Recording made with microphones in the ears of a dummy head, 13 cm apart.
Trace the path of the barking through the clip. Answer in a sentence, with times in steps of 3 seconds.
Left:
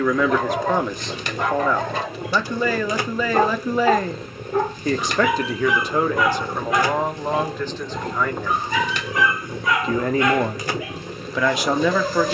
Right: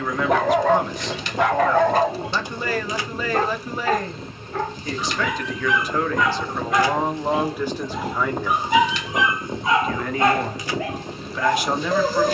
You can hear the barking on the right from 0 s, in the centre from 3 s and on the right from 9 s.